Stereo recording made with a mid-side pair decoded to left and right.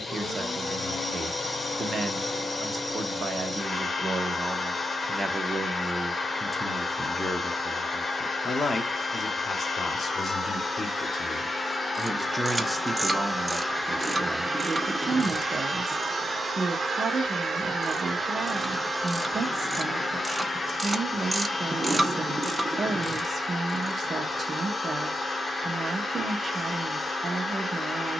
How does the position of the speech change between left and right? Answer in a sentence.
You can hear the speech move from right to left and back again.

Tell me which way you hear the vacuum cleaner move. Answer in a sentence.
In this clip you hear the vacuum cleaner go right and come back.